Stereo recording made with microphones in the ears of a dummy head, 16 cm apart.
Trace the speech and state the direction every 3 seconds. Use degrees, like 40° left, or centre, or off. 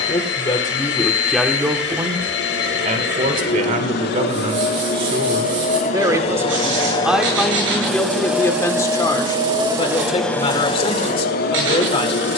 centre, 40° right, centre, 30° left.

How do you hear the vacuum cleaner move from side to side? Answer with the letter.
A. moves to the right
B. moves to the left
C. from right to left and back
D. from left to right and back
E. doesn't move
D.